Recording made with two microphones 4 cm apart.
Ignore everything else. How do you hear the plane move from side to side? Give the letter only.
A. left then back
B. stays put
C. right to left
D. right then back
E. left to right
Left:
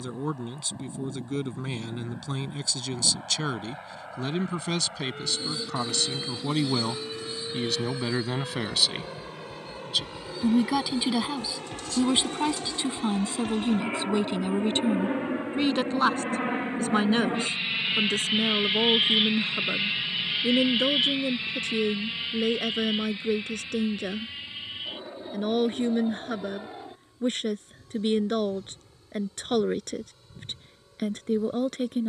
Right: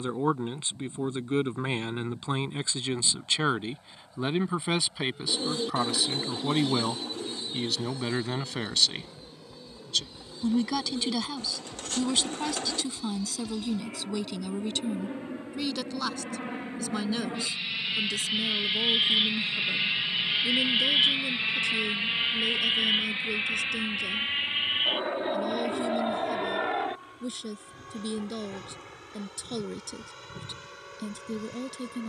E.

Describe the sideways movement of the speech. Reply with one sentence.
You can hear the speech move from right to left.